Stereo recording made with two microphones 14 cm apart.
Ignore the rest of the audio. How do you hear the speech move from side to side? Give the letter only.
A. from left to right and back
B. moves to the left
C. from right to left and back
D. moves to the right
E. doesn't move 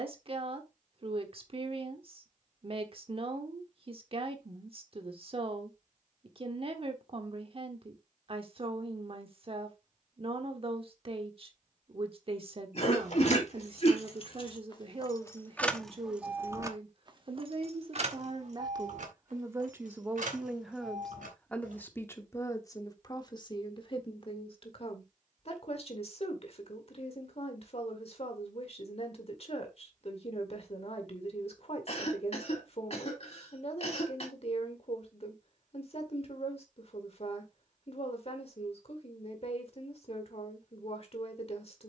B.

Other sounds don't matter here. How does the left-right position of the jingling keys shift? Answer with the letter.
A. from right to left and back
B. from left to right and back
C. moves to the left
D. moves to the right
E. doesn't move
D.